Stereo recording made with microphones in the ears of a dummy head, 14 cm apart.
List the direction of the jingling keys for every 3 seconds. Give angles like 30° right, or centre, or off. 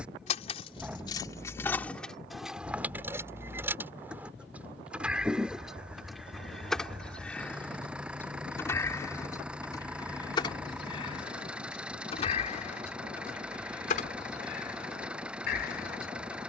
10° left, 10° right, 10° left, 30° left, 50° left, 60° left.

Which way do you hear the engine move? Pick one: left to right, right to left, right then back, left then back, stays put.
stays put.